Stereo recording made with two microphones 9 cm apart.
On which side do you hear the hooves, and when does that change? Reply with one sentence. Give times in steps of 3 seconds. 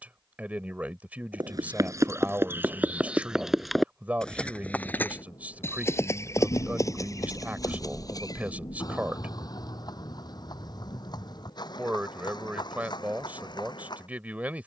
In this clip you hear the hooves on the right from 0 s, in the centre from 3 s and on the left from 6 s.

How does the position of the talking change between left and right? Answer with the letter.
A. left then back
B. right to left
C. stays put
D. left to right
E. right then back
C.